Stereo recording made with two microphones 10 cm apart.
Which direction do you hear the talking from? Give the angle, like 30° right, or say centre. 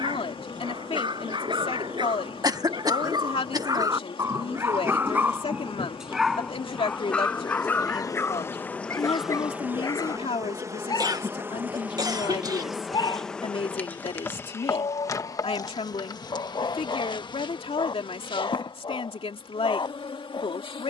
80° left.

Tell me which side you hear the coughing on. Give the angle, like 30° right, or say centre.
40° right.